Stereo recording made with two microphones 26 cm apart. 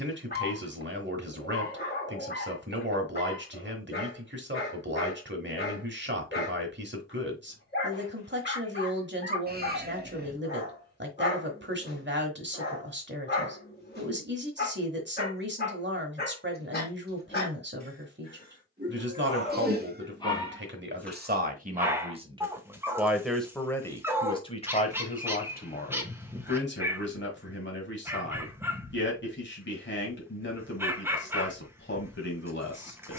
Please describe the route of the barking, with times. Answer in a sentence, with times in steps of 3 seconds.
You can hear the barking on the left from 0 s and in the centre from 21 s.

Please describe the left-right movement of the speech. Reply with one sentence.
In this clip you hear the speech go from the right side to the left.